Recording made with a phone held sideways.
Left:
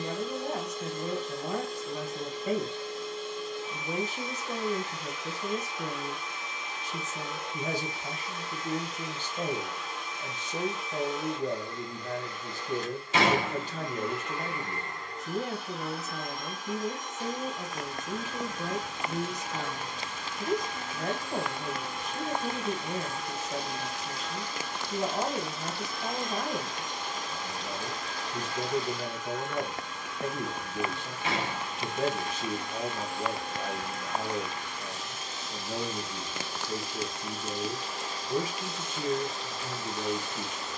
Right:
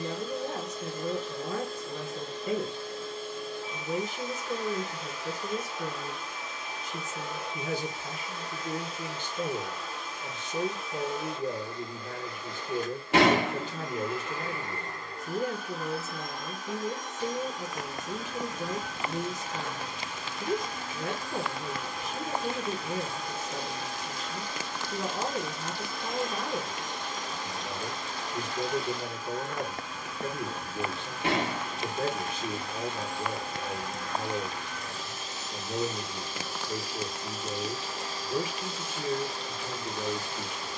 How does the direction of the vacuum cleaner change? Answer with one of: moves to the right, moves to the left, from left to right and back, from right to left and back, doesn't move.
doesn't move.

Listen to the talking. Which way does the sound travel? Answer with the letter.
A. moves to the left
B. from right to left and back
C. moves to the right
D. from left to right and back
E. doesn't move
E.